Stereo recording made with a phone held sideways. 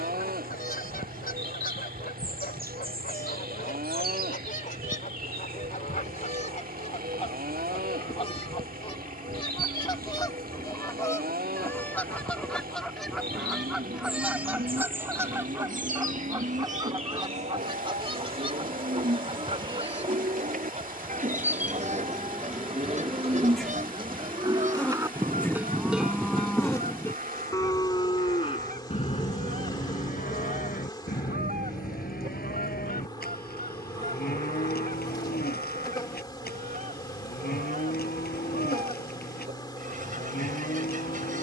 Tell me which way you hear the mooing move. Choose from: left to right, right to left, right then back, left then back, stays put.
right to left.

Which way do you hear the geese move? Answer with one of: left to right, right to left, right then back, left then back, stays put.
left to right.